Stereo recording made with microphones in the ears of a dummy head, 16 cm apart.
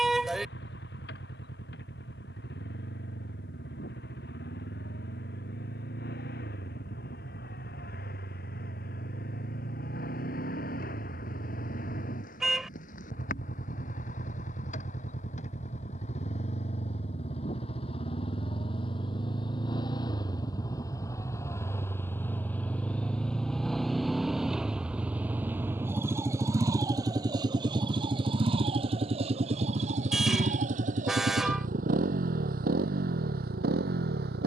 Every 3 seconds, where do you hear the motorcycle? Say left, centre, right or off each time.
left, left, left, left, left, left, left, centre, centre, right, right, right.